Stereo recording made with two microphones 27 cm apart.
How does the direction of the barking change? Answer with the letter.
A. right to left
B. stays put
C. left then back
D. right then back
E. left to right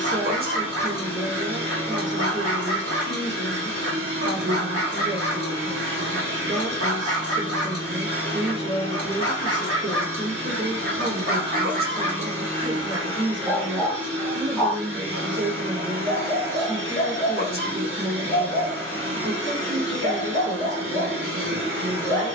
A.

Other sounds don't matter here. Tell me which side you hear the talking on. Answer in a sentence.
You can hear the talking on the right.